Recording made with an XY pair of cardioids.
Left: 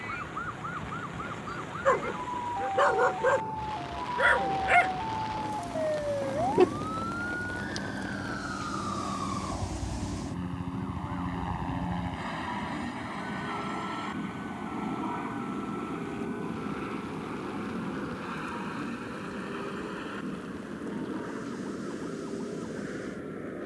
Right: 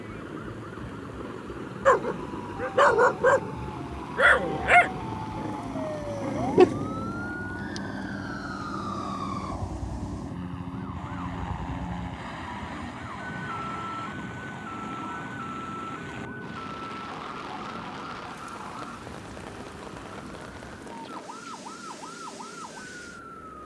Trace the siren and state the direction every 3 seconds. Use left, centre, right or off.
left, left, centre, right, right, right, right, right.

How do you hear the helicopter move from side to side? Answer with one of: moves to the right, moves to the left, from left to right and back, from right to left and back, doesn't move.
moves to the left.